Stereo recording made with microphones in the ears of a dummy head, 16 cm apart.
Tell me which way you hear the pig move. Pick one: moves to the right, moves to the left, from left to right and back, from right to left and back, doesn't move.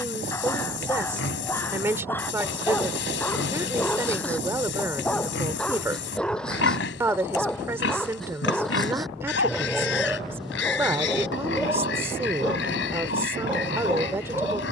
doesn't move.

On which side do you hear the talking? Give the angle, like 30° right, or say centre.
10° right.